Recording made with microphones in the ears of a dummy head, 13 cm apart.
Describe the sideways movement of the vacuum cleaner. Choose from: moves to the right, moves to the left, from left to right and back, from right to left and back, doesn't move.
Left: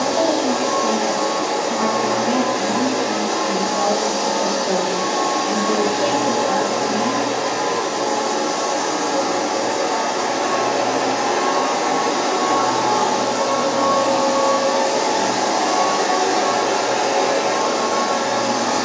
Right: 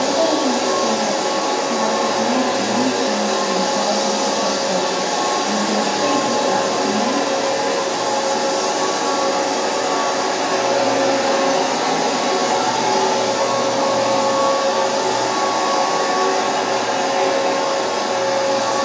moves to the left.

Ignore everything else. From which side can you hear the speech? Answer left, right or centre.
left.